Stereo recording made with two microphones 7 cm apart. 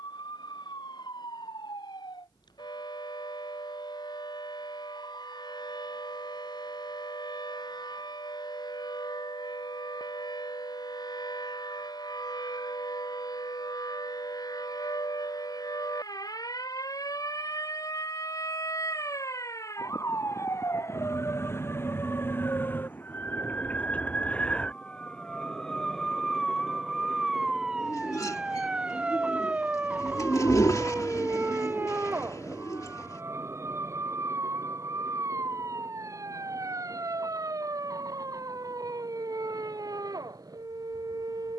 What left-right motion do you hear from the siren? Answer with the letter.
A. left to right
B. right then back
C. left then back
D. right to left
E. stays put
A.